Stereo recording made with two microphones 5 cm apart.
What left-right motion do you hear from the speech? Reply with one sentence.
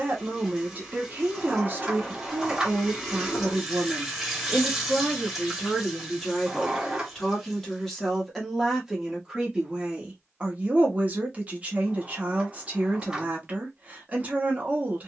You can hear the speech go left and come back.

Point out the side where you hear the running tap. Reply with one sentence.
You can hear the running tap in the centre.